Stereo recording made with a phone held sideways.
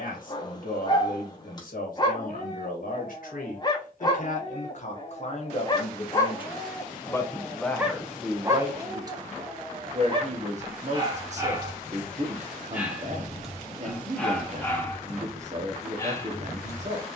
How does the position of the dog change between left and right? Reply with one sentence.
In this clip you hear the dog move from left to right and back again.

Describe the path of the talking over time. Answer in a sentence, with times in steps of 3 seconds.
In this clip you hear the talking on the left from 0 s, in the centre from 6 s and on the right from 9 s.